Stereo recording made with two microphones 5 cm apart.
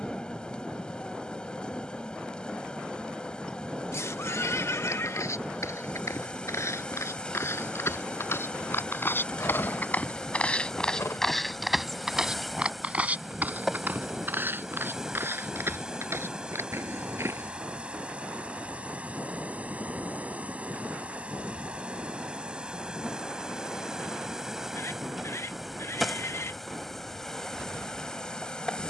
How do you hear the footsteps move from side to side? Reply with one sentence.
You can hear the footsteps go from the left side to the right.